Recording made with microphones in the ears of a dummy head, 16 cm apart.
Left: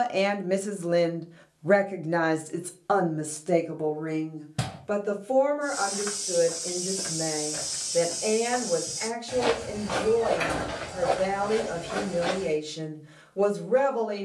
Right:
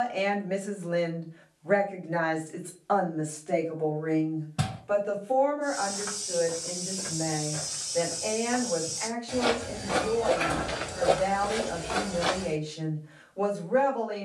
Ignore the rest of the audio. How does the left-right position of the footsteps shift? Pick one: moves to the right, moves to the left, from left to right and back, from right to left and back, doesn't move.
moves to the right.